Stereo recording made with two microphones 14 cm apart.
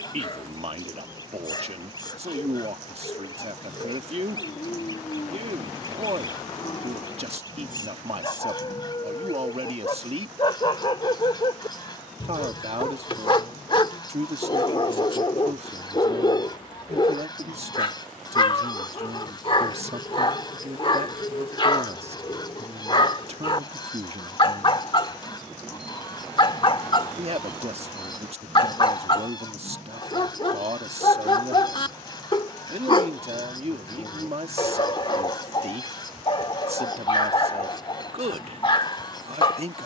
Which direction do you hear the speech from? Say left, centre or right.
right.